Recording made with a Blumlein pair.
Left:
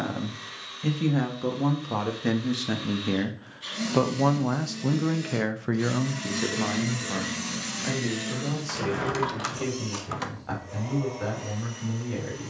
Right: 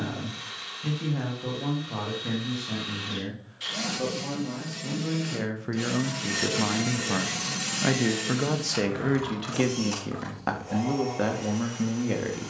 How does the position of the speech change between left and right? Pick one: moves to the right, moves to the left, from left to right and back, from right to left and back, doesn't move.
moves to the right.